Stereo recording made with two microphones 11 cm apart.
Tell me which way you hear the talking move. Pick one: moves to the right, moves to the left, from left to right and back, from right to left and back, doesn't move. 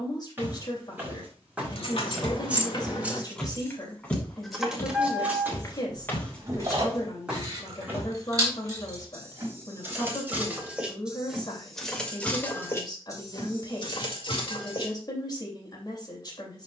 doesn't move.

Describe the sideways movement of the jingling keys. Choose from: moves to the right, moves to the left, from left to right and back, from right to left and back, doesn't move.
from left to right and back.